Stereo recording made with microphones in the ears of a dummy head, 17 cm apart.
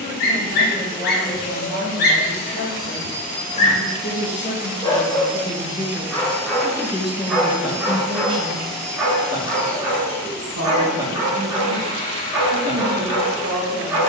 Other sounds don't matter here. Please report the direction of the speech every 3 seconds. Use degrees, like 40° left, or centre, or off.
50° left, 30° left, 10° right, 70° right, 80° right.